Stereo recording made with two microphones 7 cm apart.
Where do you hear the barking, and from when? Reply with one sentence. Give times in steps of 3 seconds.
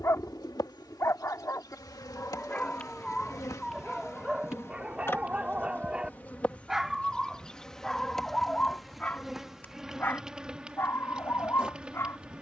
In this clip you hear the barking on the left from 0 s, in the centre from 3 s and on the left from 9 s.